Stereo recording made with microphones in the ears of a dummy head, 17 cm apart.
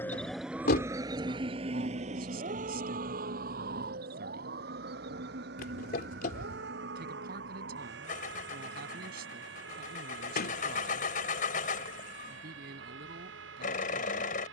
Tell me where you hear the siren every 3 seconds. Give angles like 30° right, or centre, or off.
20° right, 50° right, 60° right, 60° right, 70° right.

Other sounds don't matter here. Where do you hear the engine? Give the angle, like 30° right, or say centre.
50° left.